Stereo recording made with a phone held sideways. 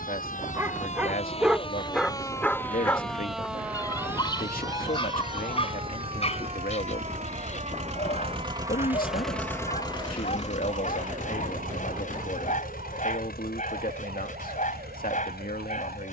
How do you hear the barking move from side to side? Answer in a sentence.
In this clip you hear the barking travel towards the left.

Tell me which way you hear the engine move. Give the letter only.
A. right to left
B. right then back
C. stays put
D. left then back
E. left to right
A.